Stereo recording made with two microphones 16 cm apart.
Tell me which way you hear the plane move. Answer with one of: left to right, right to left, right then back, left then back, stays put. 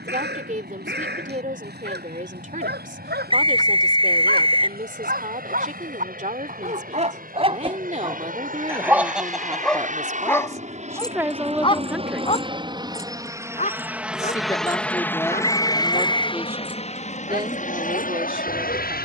right to left.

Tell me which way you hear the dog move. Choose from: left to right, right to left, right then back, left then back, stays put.
right to left.